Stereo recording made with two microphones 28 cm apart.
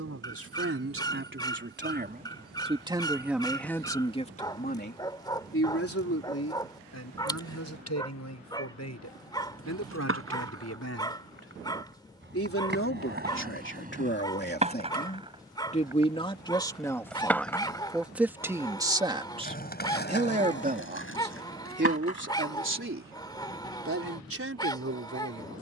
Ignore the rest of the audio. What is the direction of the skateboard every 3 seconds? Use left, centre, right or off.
off, off, off, right, right, centre, left, left, off.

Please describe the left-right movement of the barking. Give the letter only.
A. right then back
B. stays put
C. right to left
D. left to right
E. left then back
B.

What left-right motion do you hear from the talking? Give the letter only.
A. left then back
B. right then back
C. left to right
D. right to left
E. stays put
A.